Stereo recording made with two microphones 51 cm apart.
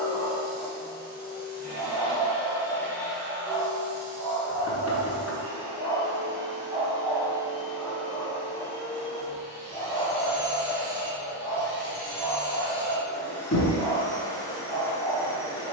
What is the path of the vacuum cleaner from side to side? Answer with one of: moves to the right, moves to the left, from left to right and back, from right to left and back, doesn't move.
from left to right and back.